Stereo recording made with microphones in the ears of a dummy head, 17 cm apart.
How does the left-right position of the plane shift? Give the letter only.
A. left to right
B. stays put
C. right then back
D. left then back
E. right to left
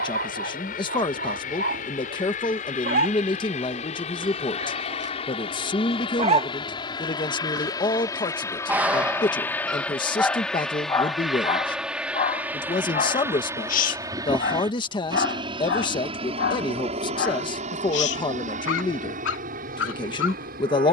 A.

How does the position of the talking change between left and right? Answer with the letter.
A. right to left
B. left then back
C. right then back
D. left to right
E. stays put
E.